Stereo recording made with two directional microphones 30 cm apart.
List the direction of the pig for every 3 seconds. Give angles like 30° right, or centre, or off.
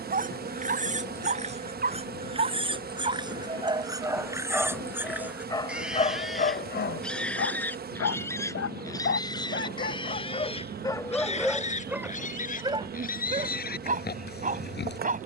20° right, 10° right, centre, 20° left, 30° left.